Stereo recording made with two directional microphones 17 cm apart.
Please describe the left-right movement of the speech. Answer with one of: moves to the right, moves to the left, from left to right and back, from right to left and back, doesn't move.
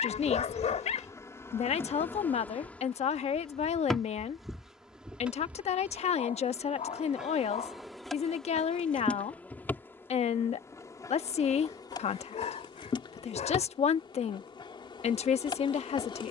doesn't move.